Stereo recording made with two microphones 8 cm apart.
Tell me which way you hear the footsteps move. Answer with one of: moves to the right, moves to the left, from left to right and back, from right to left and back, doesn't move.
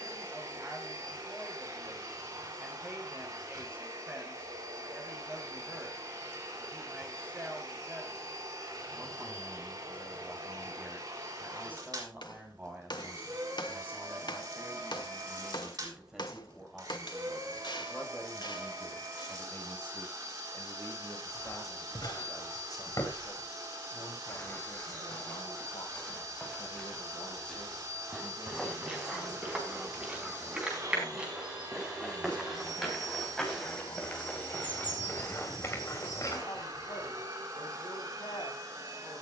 from left to right and back.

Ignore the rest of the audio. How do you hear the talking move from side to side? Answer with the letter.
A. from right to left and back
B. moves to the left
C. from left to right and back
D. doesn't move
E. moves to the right
B.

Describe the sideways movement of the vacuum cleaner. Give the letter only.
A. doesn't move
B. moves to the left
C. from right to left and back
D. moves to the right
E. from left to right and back
A.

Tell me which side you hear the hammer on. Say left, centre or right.
left.